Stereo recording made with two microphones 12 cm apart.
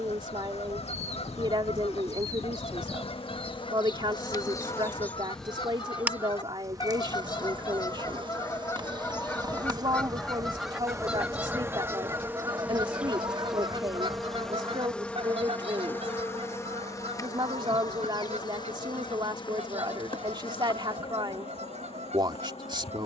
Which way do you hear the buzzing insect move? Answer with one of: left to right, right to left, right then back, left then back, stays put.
right then back.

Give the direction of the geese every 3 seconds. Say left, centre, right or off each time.
left, left, left, centre, right, right, right, right.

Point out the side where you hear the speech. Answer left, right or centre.
right.